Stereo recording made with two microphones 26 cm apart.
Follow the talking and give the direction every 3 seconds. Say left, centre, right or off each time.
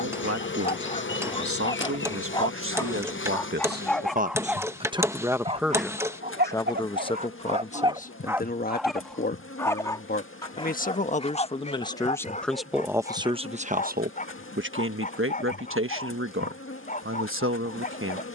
right, right, left, left, right, right.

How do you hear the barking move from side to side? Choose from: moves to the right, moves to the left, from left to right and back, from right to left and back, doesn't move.
from left to right and back.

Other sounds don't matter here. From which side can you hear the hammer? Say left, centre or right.
centre.